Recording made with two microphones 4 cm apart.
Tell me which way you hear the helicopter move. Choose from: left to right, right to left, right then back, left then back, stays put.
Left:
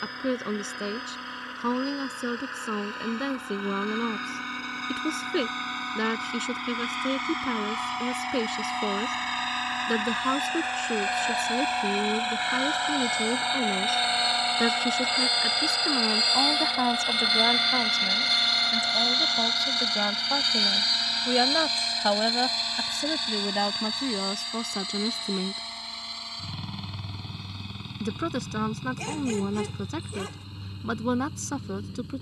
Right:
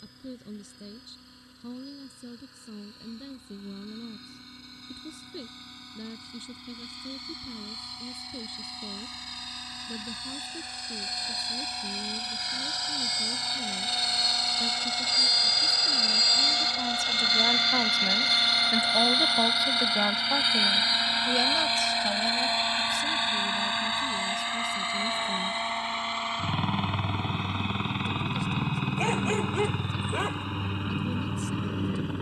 left to right.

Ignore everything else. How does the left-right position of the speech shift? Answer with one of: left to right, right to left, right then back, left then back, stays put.
right then back.